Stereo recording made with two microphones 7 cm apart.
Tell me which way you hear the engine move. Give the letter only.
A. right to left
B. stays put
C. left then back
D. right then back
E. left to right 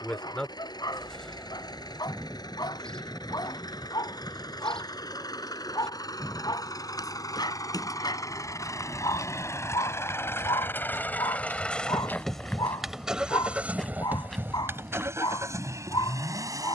E.